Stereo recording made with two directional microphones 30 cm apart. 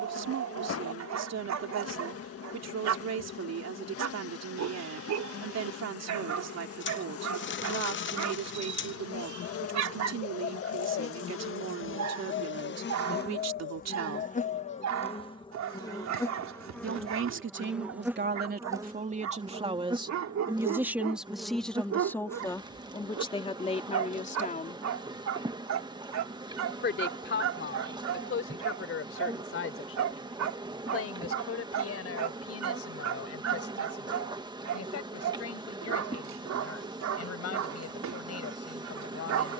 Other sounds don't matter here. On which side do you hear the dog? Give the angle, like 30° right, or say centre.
70° right.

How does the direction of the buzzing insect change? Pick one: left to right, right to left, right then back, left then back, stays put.
left to right.